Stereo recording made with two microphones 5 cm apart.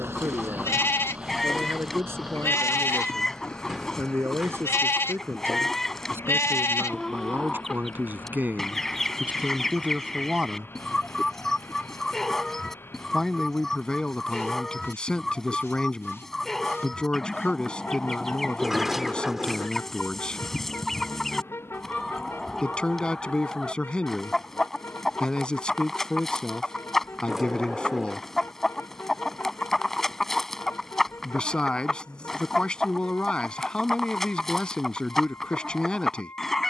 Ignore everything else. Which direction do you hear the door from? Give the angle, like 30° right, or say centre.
10° right.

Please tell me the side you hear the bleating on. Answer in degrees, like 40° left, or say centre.
60° left.